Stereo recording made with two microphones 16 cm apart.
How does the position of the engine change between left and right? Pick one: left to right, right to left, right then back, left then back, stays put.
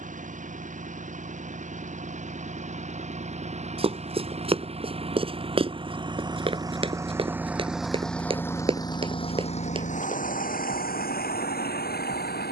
right to left.